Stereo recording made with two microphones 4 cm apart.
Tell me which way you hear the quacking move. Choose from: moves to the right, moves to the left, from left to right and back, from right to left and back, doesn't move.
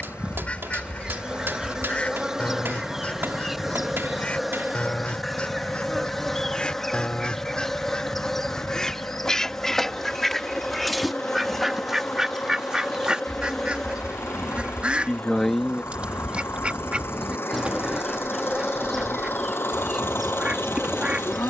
moves to the right.